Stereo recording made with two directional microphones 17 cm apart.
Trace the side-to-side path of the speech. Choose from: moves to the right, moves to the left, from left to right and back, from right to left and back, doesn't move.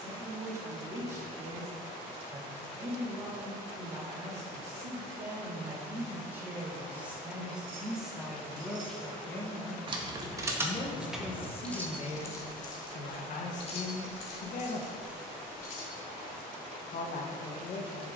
moves to the left.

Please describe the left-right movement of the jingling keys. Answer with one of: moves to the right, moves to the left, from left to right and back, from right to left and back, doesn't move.
moves to the left.